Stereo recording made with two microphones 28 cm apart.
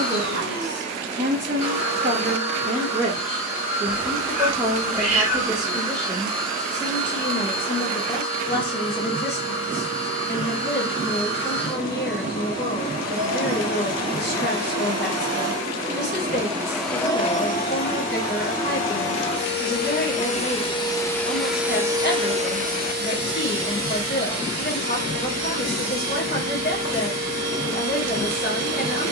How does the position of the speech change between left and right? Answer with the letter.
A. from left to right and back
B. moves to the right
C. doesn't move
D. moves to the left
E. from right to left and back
D.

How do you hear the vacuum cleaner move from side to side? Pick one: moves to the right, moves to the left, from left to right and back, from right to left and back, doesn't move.
from right to left and back.